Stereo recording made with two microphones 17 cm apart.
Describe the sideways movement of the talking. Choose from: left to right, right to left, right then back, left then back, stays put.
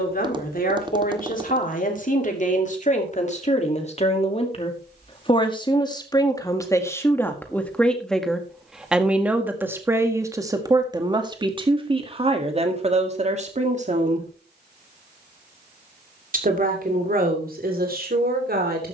left to right.